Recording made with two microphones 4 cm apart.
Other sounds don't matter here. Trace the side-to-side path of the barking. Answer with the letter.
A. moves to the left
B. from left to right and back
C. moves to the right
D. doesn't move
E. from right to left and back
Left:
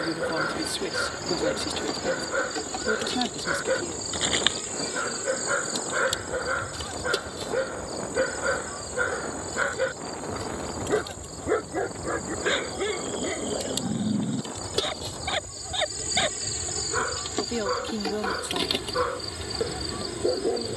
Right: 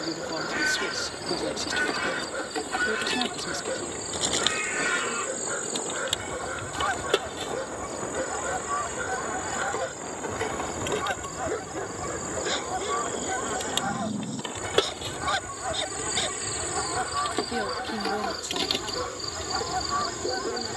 D.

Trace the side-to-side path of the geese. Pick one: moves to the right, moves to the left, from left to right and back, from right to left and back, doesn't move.
doesn't move.